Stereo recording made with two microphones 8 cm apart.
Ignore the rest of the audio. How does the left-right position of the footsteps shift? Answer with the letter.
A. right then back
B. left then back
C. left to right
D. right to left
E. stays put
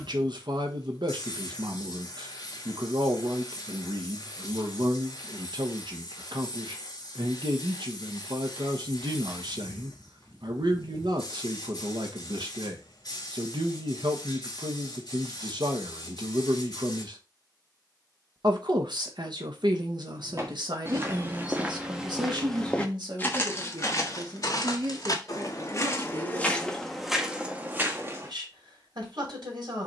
B.